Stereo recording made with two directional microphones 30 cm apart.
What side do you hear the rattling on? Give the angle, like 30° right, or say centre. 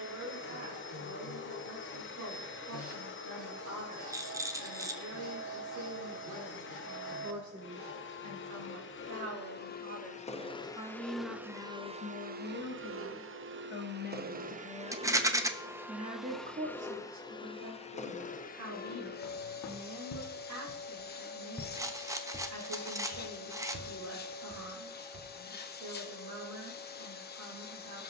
10° right.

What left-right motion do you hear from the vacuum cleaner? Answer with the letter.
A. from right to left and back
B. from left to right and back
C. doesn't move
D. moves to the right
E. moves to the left
B.